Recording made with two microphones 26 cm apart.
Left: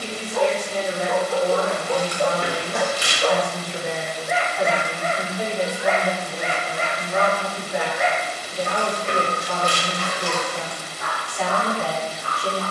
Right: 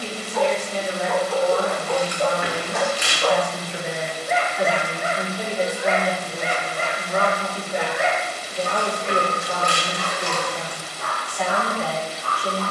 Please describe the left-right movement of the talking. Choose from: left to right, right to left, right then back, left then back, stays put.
right then back.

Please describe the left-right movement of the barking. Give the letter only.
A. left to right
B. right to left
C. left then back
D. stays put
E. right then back
E.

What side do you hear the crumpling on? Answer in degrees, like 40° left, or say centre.
30° left.